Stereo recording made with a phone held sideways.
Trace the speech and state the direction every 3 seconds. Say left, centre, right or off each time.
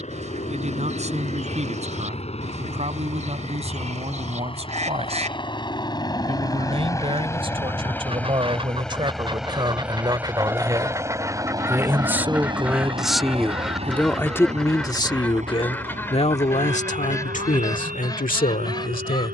right, right, right, right, centre, left, left.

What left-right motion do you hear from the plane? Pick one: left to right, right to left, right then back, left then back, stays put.
left to right.